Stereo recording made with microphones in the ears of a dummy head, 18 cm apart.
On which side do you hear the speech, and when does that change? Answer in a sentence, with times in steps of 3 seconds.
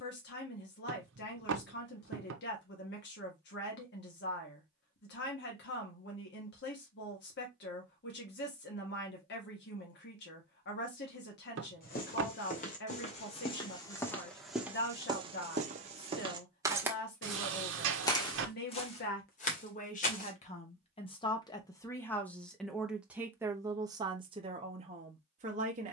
In this clip you hear the speech on the left from 0 s, in the centre from 21 s and on the right from 24 s.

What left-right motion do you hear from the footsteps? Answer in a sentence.
In this clip you hear the footsteps move from left to right and back again.